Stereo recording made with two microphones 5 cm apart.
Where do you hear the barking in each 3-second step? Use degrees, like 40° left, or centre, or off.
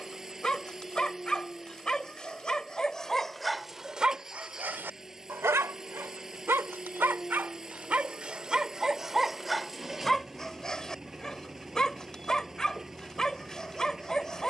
20° left, 30° right, 30° right, 10° left, 10° left.